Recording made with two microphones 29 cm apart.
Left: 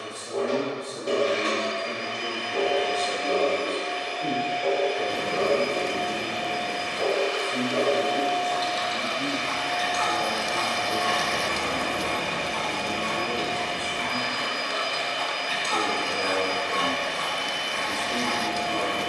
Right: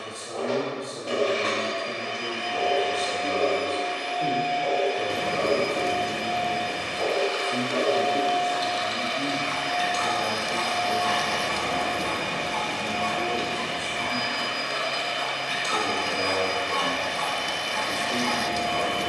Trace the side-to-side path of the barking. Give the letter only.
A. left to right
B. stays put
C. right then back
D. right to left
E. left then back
C.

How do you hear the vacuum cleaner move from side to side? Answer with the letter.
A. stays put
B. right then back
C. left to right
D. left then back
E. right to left
A.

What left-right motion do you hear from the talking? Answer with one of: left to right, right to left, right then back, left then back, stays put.
right then back.